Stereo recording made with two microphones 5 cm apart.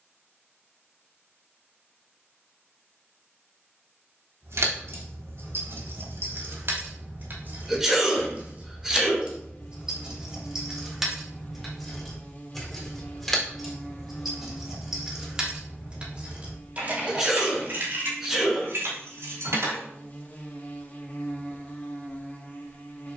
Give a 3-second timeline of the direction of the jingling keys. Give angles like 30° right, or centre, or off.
off, 70° right, 40° right, 10° right, centre, 30° right, 60° right, off.